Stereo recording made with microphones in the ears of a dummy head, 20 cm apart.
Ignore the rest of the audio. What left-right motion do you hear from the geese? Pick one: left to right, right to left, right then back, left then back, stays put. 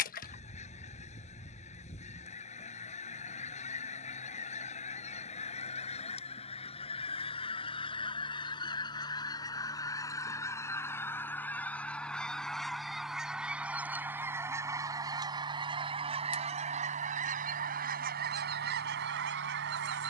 left to right.